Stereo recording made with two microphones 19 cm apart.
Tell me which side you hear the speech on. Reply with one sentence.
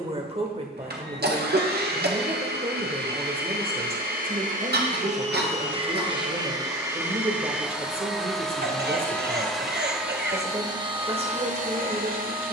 You can hear the speech on the right.